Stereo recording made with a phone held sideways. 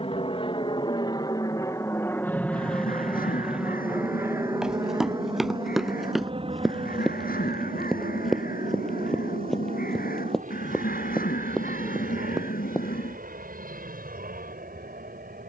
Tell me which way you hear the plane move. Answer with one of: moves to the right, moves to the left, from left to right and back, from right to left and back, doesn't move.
moves to the right.